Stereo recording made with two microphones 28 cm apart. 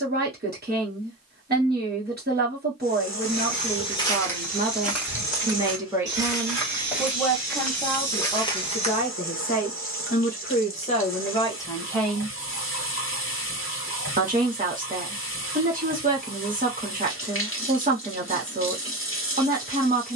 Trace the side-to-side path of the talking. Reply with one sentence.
You can hear the talking move from right to left and back again.